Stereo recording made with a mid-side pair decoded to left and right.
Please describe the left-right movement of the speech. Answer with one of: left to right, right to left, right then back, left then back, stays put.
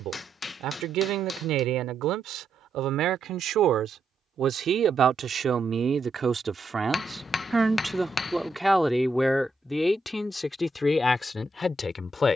right to left.